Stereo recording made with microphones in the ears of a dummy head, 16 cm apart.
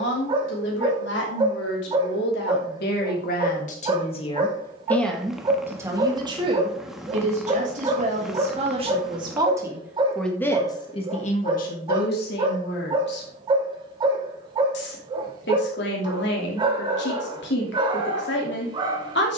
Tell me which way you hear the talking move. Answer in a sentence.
In this clip you hear the talking move from left to right and back again.